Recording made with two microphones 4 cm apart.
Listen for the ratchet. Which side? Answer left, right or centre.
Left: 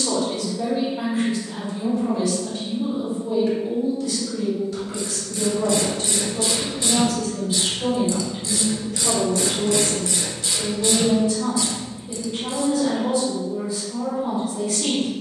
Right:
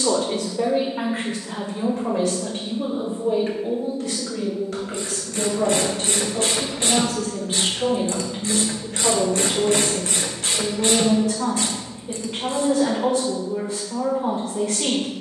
right.